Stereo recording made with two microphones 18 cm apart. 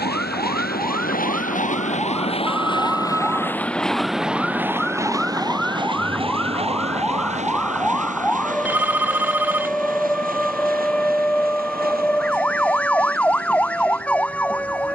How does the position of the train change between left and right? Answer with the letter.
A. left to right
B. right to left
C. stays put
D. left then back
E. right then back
A.